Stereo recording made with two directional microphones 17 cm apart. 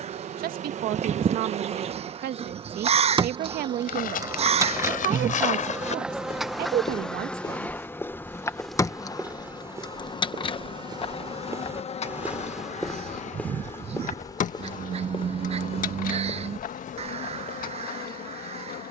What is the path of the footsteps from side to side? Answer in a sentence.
In this clip you hear the footsteps go right and come back.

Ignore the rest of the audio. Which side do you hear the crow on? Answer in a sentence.
In this clip you hear the crow on the right.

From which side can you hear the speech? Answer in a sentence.
In this clip you hear the speech on the right.